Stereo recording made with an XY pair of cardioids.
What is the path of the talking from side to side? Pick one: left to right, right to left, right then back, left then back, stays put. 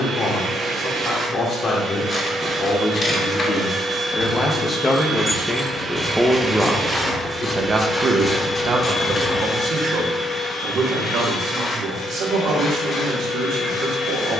left to right.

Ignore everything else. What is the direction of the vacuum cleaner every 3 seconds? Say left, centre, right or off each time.
right, right, centre, left, left.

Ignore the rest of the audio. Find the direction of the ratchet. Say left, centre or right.
left.